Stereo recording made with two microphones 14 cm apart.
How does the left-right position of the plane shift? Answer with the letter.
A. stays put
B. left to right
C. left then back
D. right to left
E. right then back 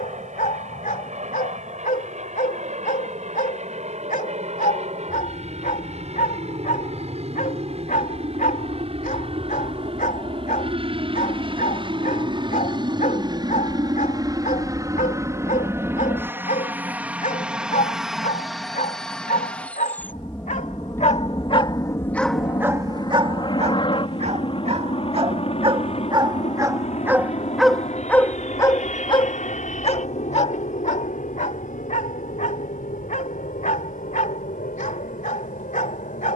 D.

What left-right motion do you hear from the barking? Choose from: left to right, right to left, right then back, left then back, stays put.
right then back.